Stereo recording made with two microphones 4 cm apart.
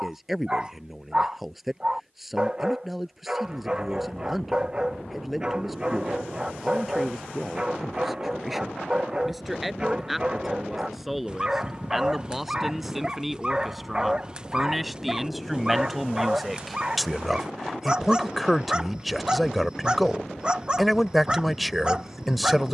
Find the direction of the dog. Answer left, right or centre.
right.